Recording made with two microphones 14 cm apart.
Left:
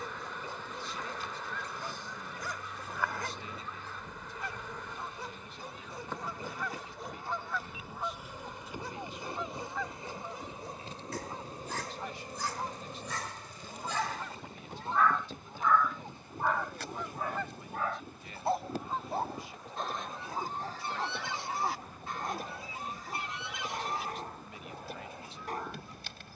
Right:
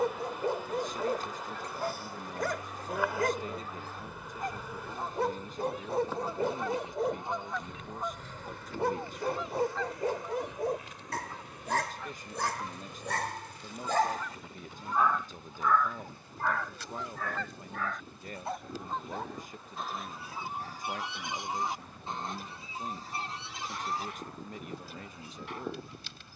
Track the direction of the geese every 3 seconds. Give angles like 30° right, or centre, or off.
40° right, 40° right, 20° right, 10° left, 30° left, 20° left, centre, 30° right, 40° right.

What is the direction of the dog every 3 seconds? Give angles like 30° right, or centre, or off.
70° right, 70° right, 70° right, 70° right, 60° right, 10° left, 40° left, 40° left, 40° left.